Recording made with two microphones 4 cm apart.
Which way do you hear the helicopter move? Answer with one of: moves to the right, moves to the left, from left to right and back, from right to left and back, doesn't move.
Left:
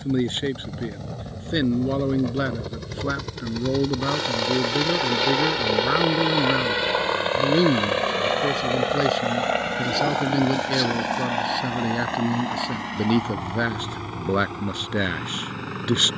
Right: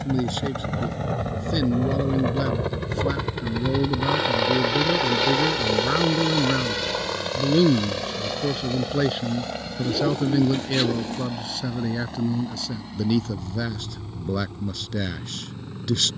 moves to the left.